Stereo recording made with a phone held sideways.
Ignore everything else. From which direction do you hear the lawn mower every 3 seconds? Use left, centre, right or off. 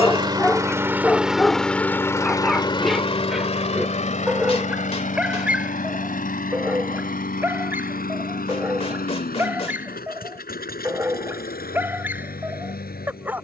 centre, left, left, left, left.